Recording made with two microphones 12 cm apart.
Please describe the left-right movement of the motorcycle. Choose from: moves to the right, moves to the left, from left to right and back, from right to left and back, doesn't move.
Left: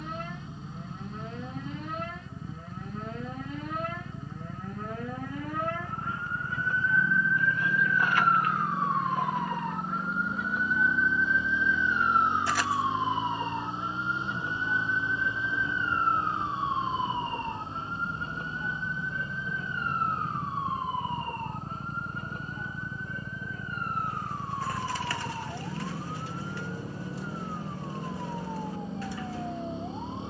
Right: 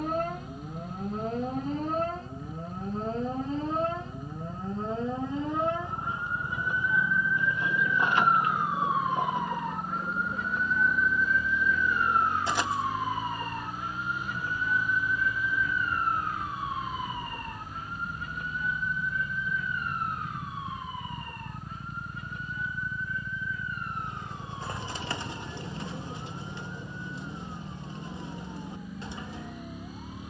doesn't move.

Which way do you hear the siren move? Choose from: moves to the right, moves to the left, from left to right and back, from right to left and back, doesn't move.
moves to the left.